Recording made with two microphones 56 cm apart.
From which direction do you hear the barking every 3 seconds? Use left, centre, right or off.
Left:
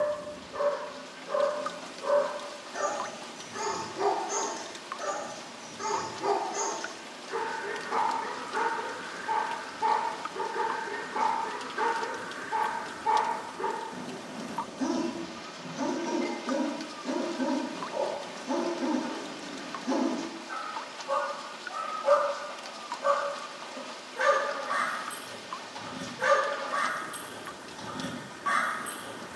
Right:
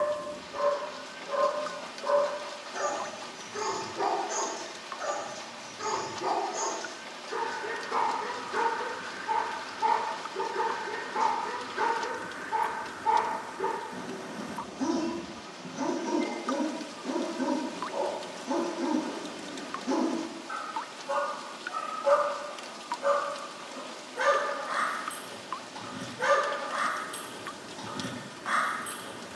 centre, left, left, centre, centre, centre, centre, centre, centre, centre.